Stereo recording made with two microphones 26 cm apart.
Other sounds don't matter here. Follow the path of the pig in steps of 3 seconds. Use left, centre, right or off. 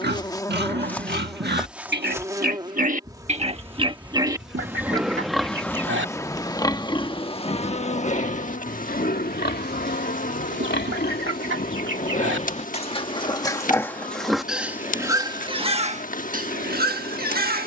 right, centre, left, left, centre, right.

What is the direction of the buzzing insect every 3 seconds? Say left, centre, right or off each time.
centre, centre, left, left, left, left.